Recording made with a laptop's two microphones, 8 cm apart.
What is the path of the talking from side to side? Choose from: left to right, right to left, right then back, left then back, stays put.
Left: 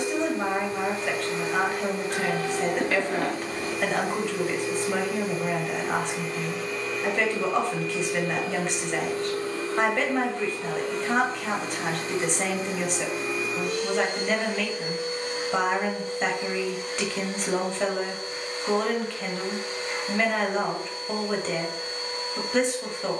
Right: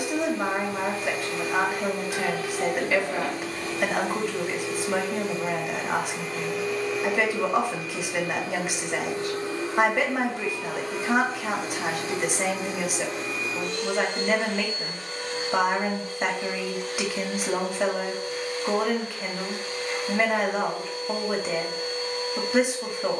stays put.